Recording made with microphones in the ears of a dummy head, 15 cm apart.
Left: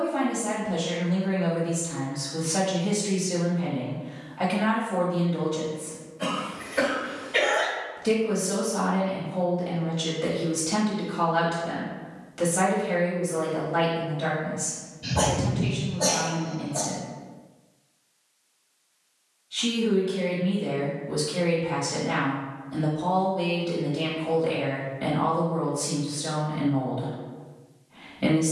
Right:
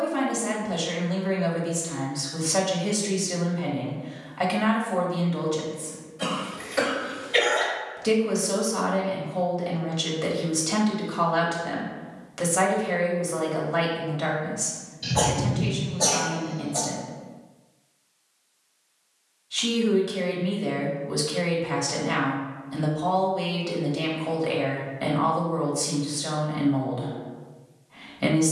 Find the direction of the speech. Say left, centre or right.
right.